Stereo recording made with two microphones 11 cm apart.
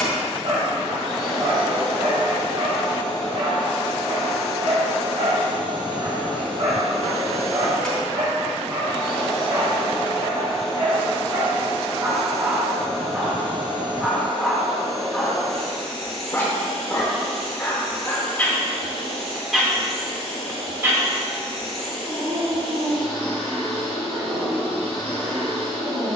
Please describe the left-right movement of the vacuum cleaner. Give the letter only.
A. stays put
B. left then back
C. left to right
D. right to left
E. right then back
A.